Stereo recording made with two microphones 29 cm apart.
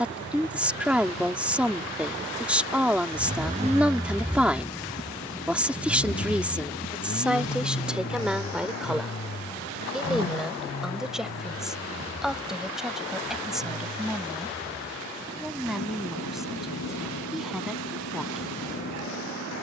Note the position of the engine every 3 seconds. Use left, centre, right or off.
right, centre, left, left, left, left, left.